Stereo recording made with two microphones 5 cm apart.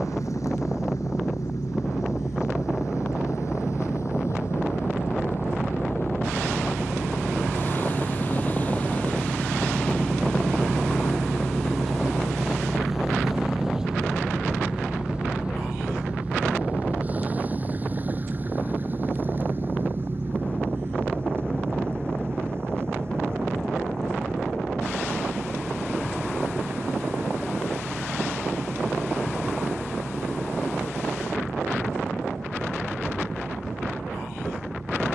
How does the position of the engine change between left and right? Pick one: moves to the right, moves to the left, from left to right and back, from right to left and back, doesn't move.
moves to the right.